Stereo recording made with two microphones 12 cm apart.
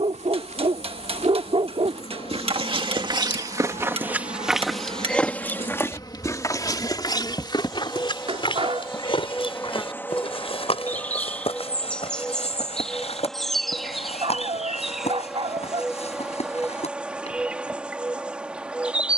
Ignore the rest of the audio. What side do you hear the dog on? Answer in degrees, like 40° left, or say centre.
50° right.